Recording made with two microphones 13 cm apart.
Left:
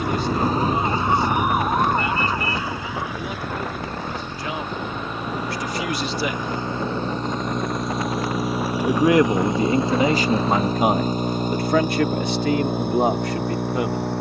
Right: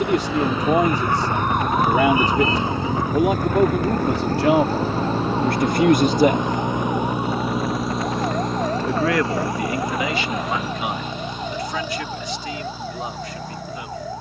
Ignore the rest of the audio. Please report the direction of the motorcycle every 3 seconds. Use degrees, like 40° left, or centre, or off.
50° right, 30° right, 10° right, 30° left, 50° left.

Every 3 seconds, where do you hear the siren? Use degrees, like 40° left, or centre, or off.
10° left, 50° right, 60° right, 70° right, 70° right.